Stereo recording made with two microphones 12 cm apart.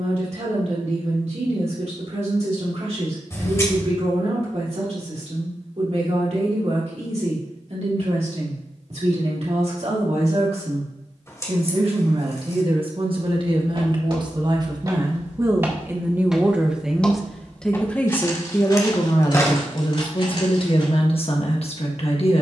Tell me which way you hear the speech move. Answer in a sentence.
You can hear the speech go from the right side to the left.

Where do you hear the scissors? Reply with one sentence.
In this clip you hear the scissors on the left.